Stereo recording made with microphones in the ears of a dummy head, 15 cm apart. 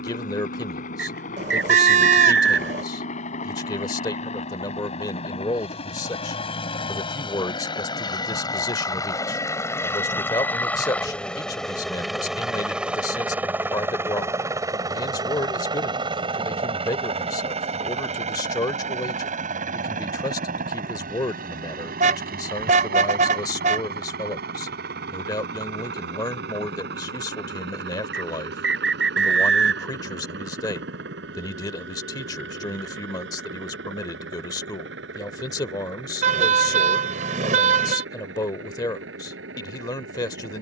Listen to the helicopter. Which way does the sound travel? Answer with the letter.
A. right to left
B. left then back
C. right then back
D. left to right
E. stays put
D.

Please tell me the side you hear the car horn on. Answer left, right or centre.
right.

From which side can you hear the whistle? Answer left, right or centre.
right.